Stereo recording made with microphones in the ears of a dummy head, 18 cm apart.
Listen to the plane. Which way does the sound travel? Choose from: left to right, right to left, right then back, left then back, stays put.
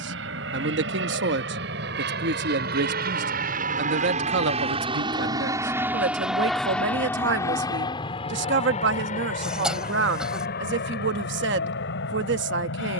right to left.